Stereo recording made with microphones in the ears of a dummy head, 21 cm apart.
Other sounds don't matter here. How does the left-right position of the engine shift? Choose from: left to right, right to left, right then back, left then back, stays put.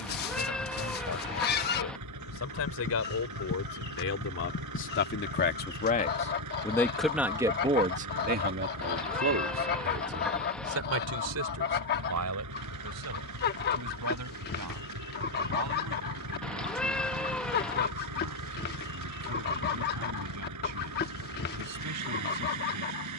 stays put.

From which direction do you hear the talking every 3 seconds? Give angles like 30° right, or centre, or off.
70° left, 50° left, 20° right, 70° right, 80° right, 80° right, 80° right, 80° right.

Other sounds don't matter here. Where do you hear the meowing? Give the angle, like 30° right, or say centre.
centre.